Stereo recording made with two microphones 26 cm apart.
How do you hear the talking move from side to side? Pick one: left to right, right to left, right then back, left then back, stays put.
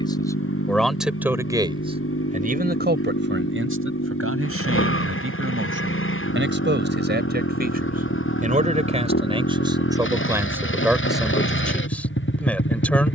right then back.